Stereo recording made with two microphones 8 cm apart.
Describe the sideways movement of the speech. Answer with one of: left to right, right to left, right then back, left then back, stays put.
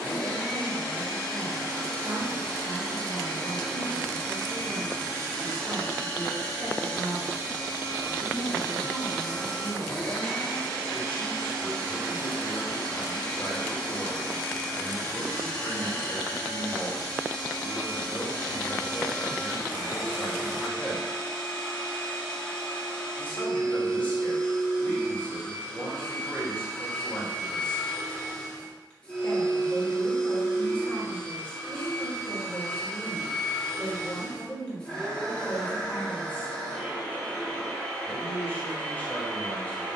right to left.